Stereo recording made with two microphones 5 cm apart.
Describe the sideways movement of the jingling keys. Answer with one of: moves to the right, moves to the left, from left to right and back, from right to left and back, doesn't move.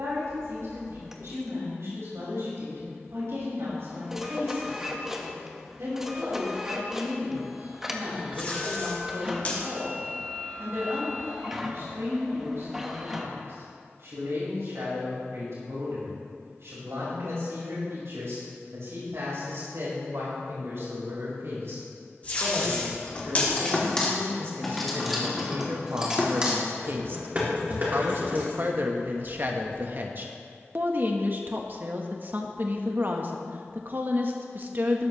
moves to the right.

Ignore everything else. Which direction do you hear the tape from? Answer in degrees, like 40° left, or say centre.
30° left.